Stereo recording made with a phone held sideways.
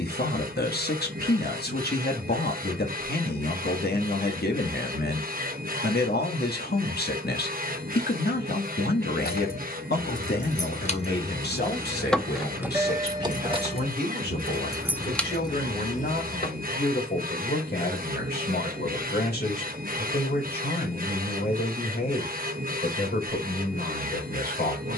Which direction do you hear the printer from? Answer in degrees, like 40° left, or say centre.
60° right.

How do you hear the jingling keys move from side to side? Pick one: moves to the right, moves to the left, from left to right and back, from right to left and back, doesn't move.
from left to right and back.